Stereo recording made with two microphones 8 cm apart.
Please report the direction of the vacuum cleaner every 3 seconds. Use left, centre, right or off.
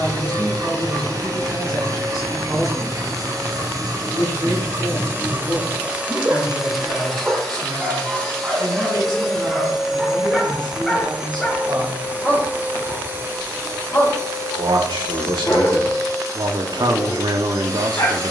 right, right, centre, centre, right, right.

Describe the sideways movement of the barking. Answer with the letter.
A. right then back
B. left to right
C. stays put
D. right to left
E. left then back
D.